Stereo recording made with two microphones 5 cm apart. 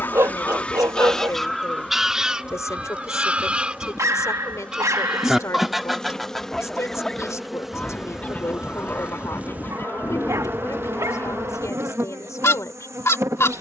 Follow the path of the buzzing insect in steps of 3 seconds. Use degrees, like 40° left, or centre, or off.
30° left, 20° left, centre, 40° right, 70° right.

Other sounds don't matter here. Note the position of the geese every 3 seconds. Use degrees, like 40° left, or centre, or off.
centre, 10° right, 20° left, 60° left, 60° left.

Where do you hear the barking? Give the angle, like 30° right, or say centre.
80° right.